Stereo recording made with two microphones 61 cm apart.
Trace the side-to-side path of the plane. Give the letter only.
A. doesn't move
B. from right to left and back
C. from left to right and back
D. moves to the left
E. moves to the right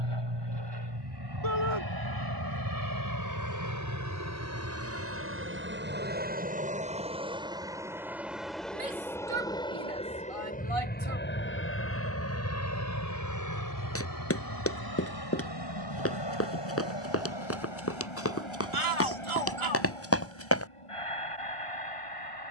D.